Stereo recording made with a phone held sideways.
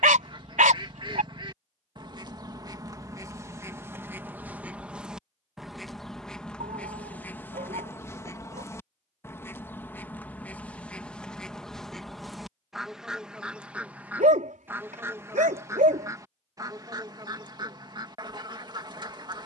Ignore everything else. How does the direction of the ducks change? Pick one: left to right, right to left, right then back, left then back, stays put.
left then back.